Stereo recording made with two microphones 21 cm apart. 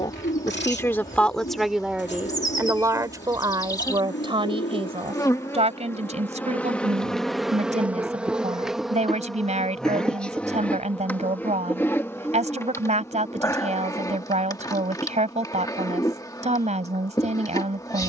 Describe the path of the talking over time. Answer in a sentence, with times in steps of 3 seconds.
You can hear the talking in the centre from 0 s and on the right from 3 s.